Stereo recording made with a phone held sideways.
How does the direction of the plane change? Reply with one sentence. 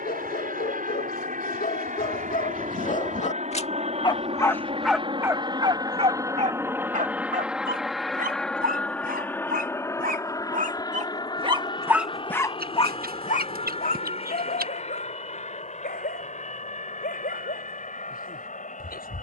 In this clip you hear the plane go from the right side to the left.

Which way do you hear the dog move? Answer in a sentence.
You can hear the dog move from left to right and back again.